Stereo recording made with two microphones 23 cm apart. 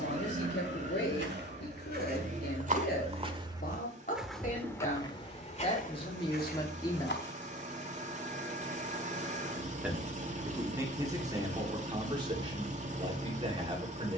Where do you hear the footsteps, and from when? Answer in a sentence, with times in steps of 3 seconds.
In this clip you hear the footsteps on the right from 0 s, in the centre from 3 s, on the left from 6 s and not at all from 9 s.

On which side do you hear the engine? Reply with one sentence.
In this clip you hear the engine on the right.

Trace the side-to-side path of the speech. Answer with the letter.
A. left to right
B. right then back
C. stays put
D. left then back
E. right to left
A.